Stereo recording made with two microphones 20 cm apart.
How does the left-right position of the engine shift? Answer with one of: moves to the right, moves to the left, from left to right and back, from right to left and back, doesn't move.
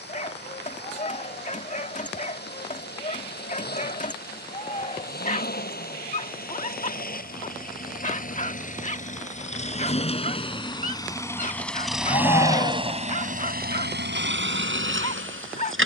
moves to the right.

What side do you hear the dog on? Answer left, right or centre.
left.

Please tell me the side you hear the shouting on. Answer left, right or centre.
left.